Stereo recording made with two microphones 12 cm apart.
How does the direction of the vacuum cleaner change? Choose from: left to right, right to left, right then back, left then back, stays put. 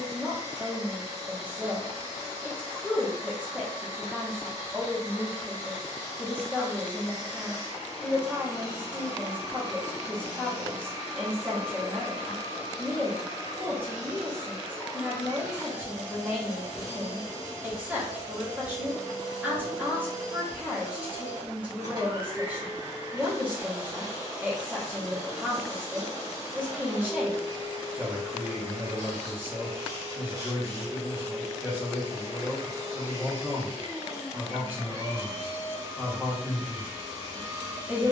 stays put.